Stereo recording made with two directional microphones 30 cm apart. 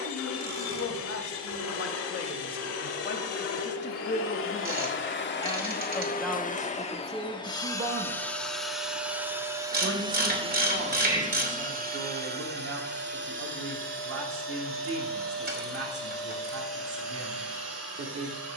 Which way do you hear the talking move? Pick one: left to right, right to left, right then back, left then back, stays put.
left to right.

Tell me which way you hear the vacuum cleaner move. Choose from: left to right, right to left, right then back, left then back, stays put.
left to right.